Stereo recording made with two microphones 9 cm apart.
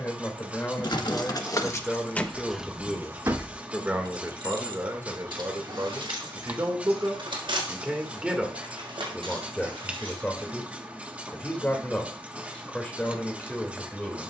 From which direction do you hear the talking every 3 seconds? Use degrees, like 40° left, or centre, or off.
10° left, 30° right, 20° right, 10° left, 10° left.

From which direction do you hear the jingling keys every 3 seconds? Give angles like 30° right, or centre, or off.
20° left, 60° right, 80° right, 80° right, off.